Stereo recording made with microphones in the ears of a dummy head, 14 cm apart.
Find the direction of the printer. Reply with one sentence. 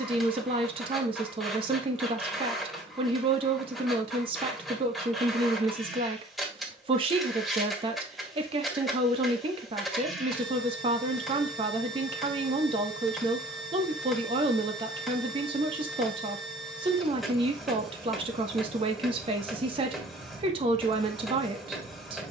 You can hear the printer in the centre.